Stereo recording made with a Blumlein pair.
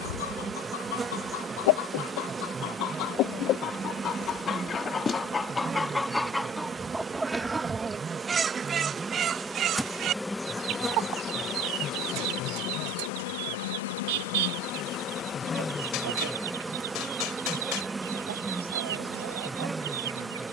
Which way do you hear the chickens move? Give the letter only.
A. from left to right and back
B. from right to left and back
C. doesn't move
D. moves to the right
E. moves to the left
D.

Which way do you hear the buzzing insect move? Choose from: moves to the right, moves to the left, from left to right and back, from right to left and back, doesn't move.
from right to left and back.